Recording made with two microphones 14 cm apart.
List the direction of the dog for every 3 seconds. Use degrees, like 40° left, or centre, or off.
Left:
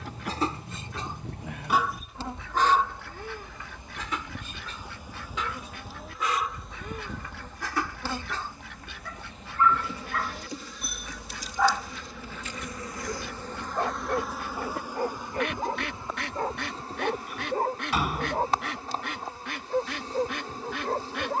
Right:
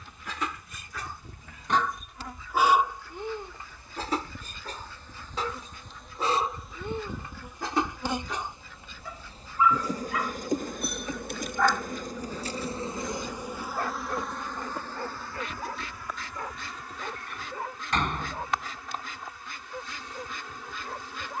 10° left, 30° right, 20° right, centre, 30° left, 40° left, 50° left.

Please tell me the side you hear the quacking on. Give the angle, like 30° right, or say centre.
70° left.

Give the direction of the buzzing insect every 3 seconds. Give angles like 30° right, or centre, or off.
30° left, 20° left, 10° right, 40° right, 10° right, 30° left, 30° left.